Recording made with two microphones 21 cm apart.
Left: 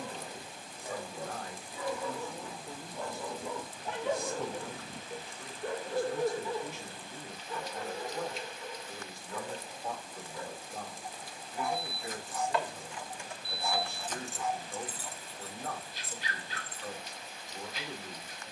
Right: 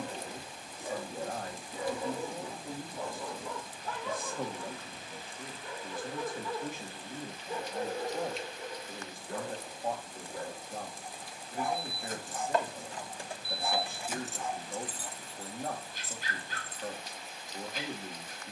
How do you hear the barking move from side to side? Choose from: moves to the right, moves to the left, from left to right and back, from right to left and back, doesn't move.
from right to left and back.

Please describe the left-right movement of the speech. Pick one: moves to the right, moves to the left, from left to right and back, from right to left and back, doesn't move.
doesn't move.